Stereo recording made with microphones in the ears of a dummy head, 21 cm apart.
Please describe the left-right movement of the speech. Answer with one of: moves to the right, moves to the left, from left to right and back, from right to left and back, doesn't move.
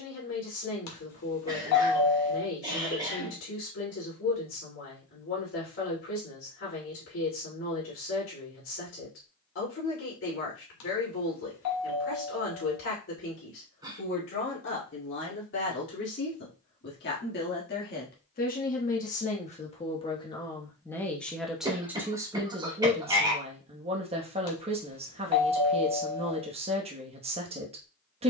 moves to the right.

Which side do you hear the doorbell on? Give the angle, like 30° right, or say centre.
80° left.